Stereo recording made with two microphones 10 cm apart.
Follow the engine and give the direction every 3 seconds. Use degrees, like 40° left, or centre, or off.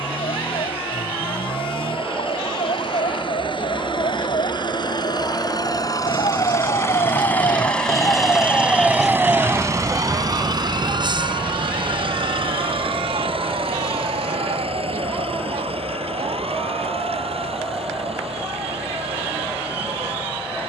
60° left, 50° left, 10° left, 40° right, 70° right, 80° right, 80° right.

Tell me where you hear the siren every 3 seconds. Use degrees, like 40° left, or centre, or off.
80° left, 70° left, 40° left, 40° right, 70° right, 80° right, 80° right.